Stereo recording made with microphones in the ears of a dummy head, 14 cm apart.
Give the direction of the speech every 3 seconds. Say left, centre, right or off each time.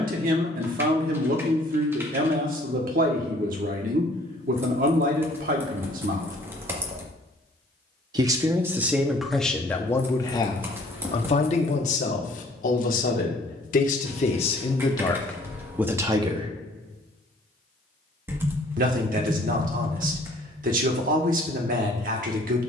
right, right, right, left, left, centre, right, right.